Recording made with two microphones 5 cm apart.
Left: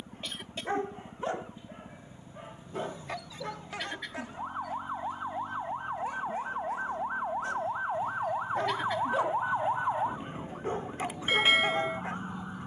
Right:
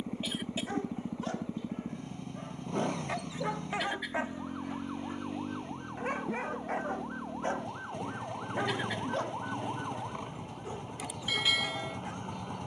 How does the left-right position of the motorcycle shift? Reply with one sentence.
You can hear the motorcycle stay in one place.